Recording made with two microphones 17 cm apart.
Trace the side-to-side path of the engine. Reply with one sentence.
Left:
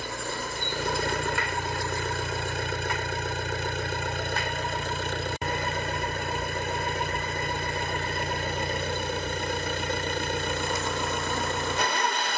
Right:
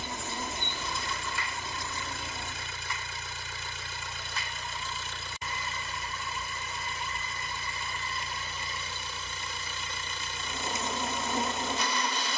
In this clip you hear the engine stay in one place.